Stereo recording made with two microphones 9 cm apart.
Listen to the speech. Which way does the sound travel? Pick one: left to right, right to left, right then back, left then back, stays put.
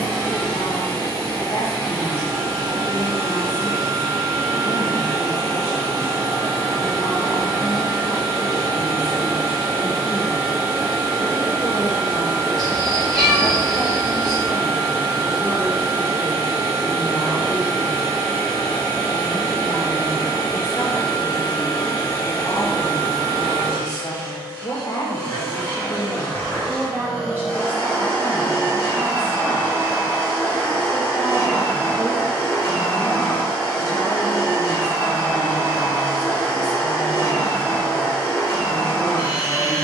right then back.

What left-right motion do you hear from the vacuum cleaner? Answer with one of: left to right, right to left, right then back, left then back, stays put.
stays put.